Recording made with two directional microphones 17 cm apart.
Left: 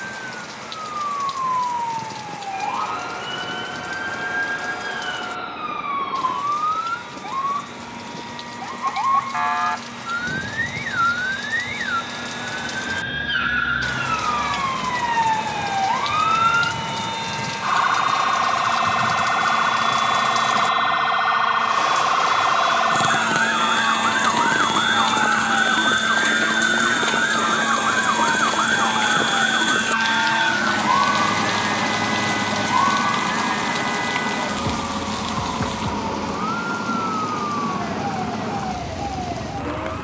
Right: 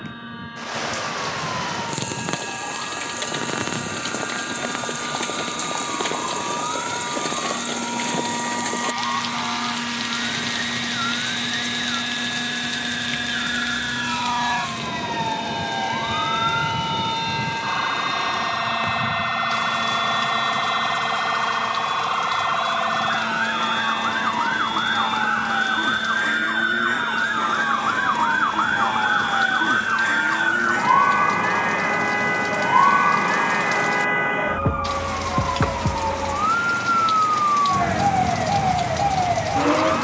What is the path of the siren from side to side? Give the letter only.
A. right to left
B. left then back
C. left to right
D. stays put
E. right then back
C.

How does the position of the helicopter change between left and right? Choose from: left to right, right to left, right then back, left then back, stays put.
right to left.